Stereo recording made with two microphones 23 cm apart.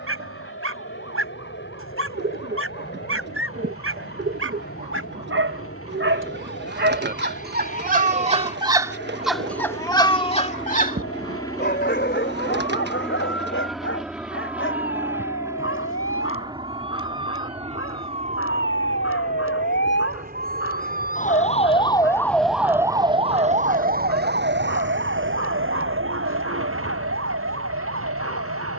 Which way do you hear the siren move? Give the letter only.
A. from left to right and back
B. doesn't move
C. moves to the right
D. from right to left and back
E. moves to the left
C.